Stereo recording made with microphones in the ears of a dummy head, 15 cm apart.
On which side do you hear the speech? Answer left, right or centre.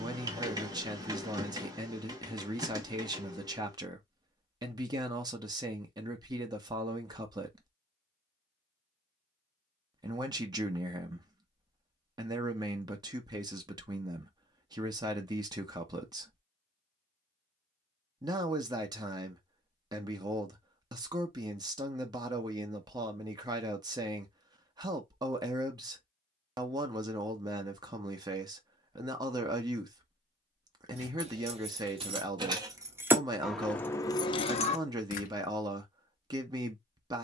right.